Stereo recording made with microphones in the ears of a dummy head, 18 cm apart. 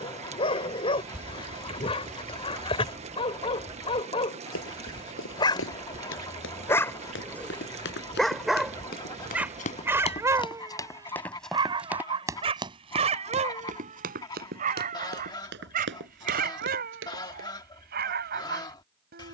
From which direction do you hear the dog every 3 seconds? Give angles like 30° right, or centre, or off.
30° left, 30° left, 10° left, 20° right, 30° right, 50° right, 50° right.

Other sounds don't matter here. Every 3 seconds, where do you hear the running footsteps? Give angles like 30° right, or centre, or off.
off, 70° left, 60° left, 20° left, 40° right, 60° right, off.